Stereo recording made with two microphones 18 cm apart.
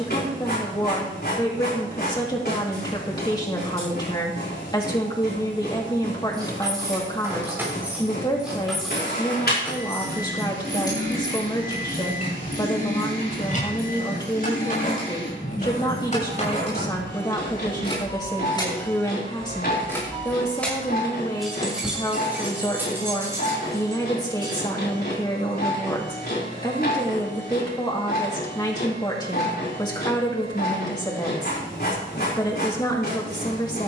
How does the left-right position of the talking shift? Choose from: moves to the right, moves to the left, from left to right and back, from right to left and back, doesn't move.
doesn't move.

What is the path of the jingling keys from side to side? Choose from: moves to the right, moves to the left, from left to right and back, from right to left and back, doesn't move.
from right to left and back.